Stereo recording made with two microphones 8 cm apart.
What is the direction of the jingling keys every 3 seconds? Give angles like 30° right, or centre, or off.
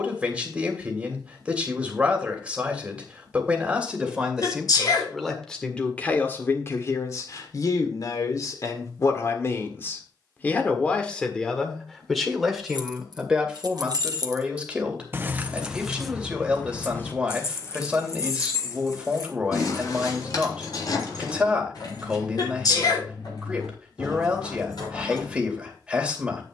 off, off, off, off, 60° right, 10° left, 50° left, 60° left, 70° left.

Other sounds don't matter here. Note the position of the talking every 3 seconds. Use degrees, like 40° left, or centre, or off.
20° right, centre, 40° left, 20° left, 10° right, 10° right, 10° right, 10° right, 10° right.